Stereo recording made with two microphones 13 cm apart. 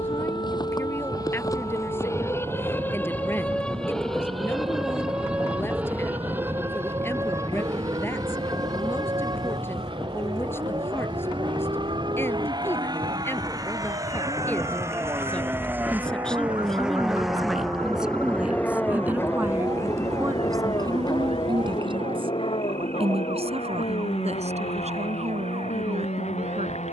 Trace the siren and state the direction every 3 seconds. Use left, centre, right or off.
left, centre, right, right, right, right, right, right, right.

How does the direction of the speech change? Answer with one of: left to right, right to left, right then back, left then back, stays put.
left to right.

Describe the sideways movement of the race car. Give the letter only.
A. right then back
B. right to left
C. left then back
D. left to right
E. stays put
B.